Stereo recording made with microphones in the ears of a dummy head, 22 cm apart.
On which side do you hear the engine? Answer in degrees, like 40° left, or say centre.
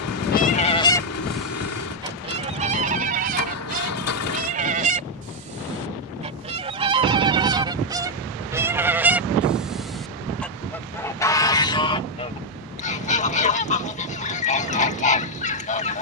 70° left.